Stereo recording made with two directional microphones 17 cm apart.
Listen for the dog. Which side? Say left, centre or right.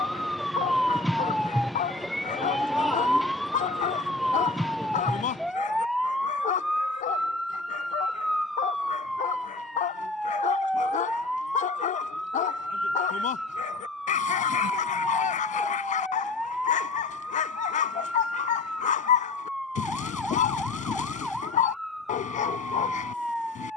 left.